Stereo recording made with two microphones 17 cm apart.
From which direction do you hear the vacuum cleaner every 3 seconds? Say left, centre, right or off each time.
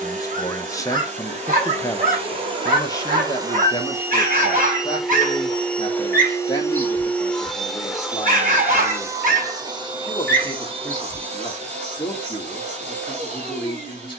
right, centre, centre, right, right.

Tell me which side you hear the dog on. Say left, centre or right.
right.